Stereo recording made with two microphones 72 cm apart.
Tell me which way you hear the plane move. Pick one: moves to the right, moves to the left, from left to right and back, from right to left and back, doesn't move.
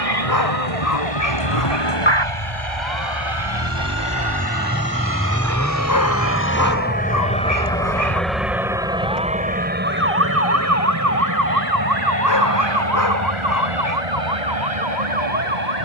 moves to the right.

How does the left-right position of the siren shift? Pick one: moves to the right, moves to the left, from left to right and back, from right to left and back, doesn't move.
moves to the right.